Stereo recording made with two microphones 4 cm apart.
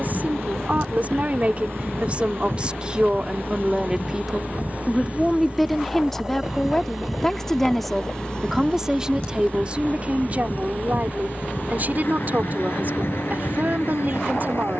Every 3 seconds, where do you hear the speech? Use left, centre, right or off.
right, centre, centre, right, right.